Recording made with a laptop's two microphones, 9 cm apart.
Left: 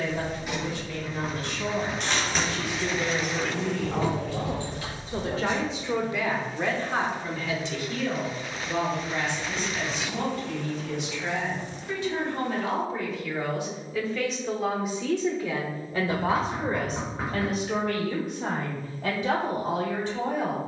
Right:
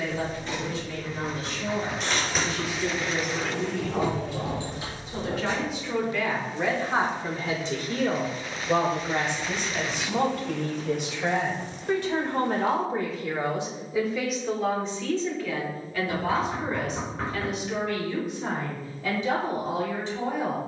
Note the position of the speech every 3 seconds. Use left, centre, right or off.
left, left, right, right, right, left, left.